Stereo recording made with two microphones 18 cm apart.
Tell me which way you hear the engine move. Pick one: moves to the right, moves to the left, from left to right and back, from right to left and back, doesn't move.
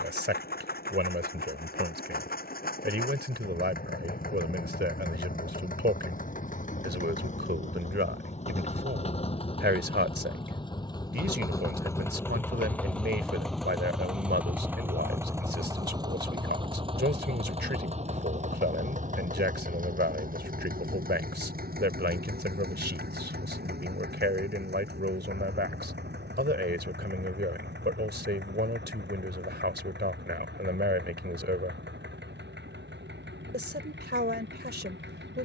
moves to the right.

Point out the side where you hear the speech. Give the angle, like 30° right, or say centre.
70° right.